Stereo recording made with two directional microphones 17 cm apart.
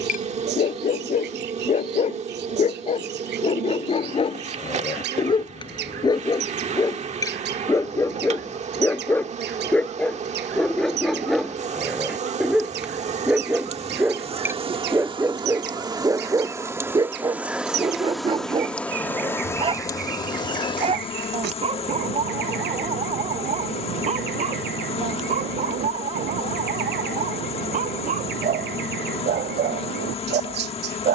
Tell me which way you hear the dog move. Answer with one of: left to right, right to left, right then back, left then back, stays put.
left to right.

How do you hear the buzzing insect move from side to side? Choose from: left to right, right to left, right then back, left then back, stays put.
right to left.